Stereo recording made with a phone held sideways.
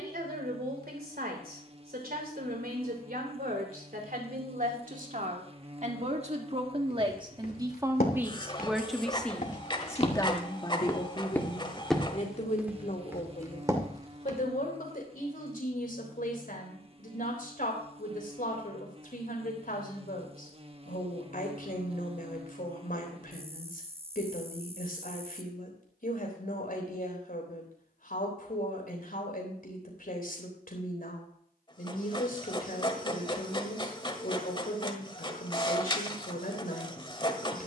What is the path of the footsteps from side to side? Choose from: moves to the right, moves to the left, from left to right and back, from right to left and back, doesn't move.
moves to the right.